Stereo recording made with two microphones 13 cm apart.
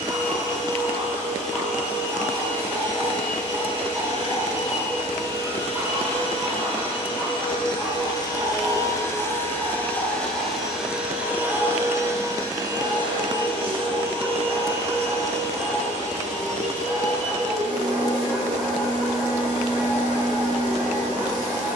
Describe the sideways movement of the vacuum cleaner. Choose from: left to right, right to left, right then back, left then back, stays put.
left to right.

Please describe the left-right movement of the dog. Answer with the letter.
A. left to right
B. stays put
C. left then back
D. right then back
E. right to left
B.